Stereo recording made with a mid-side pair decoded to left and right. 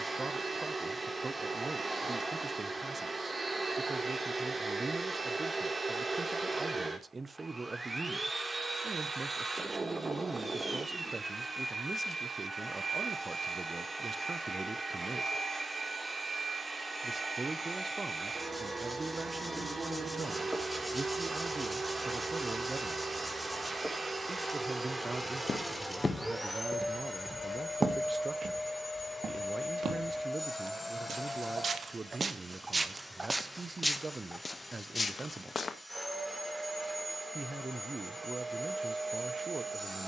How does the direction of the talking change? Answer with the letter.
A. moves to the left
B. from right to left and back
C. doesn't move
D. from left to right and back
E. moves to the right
C.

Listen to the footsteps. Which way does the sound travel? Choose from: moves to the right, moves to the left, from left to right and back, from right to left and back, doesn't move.
from left to right and back.